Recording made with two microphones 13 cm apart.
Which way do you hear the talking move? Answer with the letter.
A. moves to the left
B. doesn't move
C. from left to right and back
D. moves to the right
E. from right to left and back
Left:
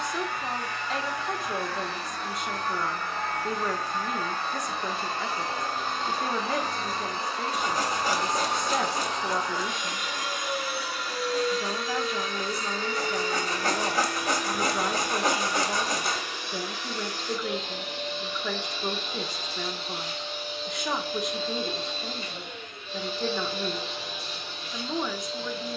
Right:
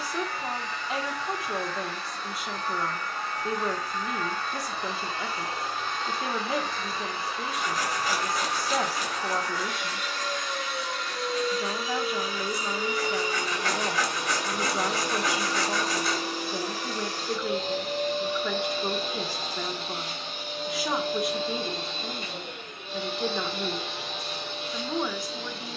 B.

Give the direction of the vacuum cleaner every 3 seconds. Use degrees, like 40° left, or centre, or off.
60° left, 50° left, 40° left, 10° left, 20° right, 40° right, 60° right, 60° right, 70° right.